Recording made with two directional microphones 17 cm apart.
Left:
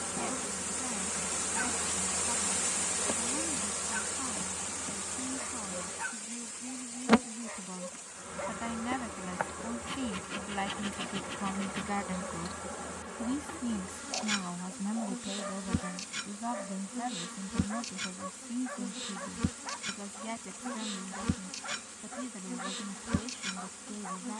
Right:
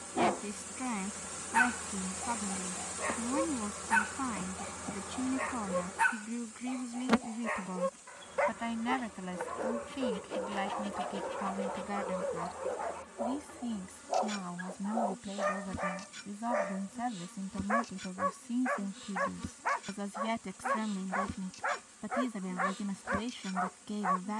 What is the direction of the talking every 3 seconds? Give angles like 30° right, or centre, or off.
40° right, 40° right, 30° right, centre, 10° left, 10° right, 30° right, 40° right.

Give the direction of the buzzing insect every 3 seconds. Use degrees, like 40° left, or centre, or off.
20° left, centre, 30° left, 50° left, 50° left, 50° left, 50° left, 50° left.